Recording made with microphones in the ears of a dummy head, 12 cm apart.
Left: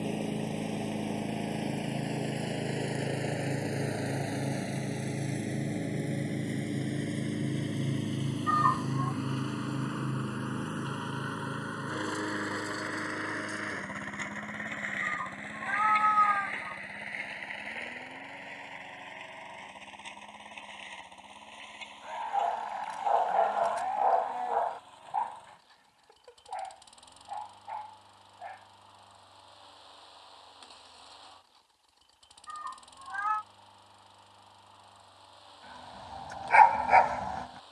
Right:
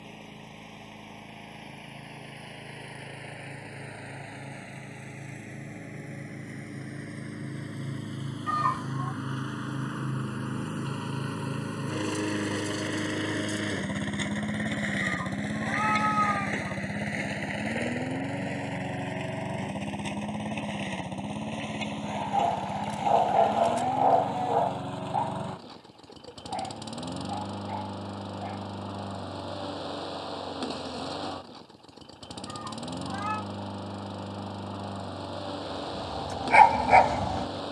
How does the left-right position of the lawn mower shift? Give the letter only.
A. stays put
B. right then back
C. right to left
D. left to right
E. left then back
D.